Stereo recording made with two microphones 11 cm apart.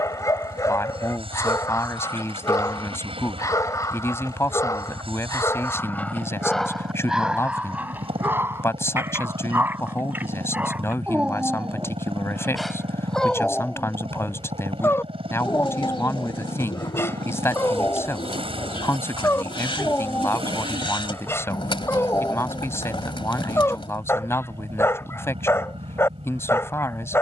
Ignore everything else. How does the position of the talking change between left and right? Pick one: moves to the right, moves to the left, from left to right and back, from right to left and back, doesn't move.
doesn't move.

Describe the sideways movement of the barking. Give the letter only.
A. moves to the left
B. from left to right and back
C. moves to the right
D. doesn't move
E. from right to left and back
B.